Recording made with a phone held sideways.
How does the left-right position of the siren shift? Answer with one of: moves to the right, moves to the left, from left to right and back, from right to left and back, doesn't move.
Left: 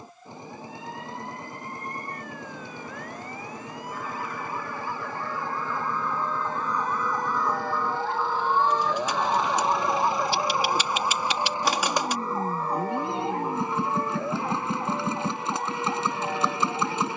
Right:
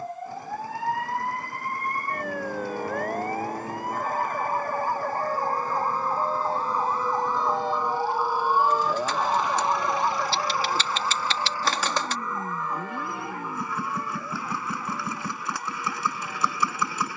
moves to the left.